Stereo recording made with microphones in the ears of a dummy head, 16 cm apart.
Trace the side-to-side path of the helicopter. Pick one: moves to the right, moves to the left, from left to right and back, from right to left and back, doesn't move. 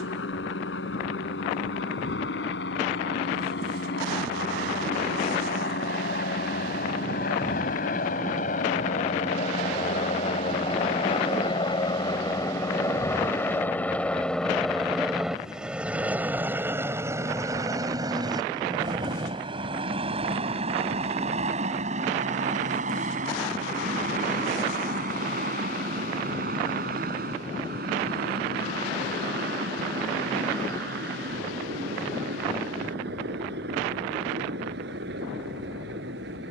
moves to the right.